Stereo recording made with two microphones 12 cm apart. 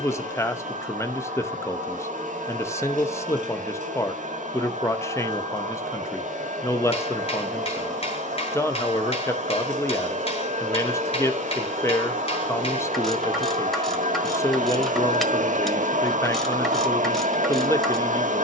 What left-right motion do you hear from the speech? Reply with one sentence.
You can hear the speech stay in one place.